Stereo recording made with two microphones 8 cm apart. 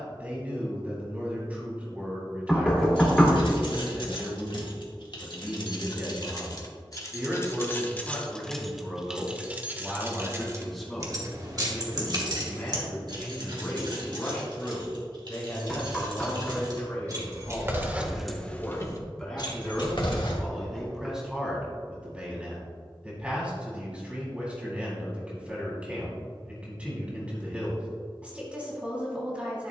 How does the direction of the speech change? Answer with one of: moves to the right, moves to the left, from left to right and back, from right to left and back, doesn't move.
from right to left and back.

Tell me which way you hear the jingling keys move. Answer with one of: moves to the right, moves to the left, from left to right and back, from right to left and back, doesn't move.
from left to right and back.